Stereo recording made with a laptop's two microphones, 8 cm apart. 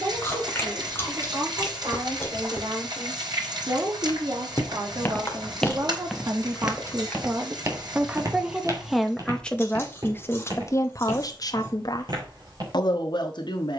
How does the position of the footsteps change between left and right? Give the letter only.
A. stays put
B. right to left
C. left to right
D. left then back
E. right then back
C.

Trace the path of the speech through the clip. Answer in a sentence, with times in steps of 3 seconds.
You can hear the speech on the right from 0 s and on the left from 9 s.